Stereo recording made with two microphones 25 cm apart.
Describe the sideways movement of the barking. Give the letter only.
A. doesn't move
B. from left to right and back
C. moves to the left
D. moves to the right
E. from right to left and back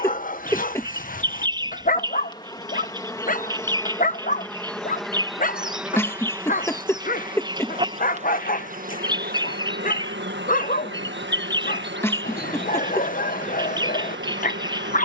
A.